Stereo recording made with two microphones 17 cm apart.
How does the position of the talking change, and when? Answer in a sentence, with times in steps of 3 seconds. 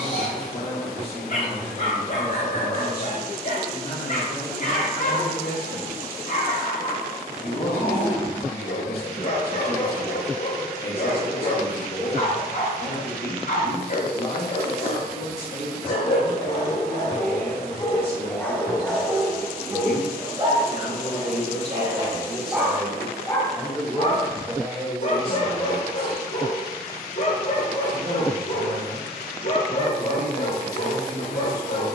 You can hear the talking on the left from 0 s and on the right from 24 s.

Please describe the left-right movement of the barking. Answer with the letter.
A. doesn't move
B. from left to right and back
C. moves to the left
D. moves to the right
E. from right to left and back
B.